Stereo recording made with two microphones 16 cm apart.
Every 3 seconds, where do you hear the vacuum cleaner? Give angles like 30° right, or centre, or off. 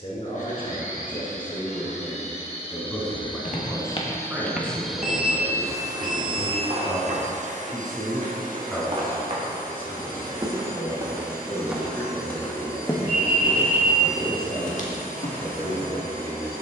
50° left, 10° left, 50° right, 70° right, 70° right, 70° right.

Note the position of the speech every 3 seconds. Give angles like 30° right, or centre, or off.
30° left, 10° right, 10° right, 20° left, 30° left, 40° left.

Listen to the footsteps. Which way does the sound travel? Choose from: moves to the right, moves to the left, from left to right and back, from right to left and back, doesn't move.
from left to right and back.